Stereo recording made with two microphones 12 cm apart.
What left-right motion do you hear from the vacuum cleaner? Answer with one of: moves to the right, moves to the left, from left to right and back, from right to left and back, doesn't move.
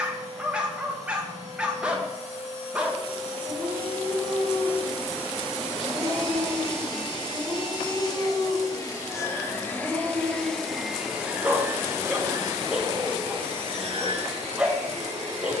moves to the right.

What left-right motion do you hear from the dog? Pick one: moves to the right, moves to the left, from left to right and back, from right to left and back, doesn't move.
doesn't move.